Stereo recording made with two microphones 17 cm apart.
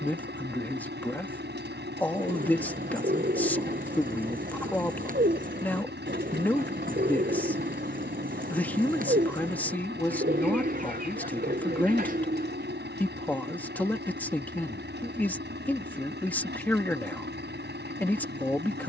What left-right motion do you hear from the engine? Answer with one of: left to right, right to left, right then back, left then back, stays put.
stays put.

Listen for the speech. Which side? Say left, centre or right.
centre.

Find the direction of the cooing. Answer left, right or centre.
right.